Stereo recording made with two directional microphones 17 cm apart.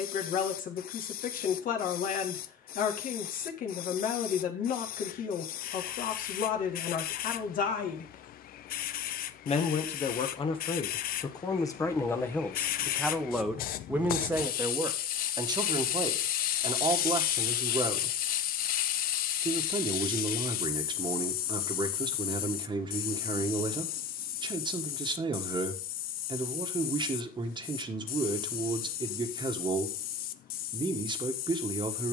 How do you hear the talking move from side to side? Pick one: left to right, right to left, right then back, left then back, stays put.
left to right.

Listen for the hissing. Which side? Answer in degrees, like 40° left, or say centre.
60° left.